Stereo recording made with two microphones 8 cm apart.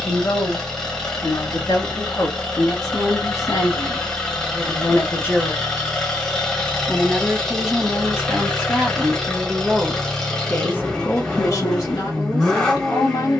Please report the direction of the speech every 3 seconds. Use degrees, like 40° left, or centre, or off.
60° left, 40° left, 10° right, 20° left, 60° left.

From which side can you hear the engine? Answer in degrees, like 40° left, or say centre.
10° left.